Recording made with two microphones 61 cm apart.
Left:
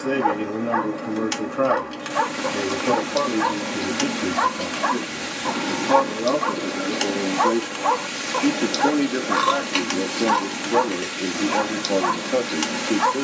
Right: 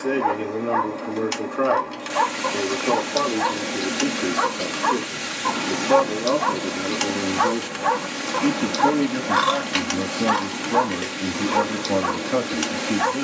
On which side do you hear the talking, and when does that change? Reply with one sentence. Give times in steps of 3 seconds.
In this clip you hear the talking on the left from 0 s, in the centre from 6 s and on the right from 9 s.